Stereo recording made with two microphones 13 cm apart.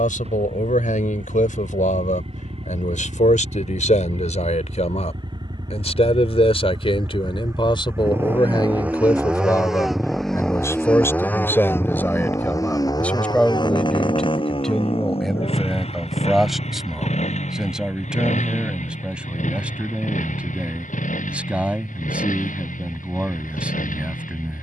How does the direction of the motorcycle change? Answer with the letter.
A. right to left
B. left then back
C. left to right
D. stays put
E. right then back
A.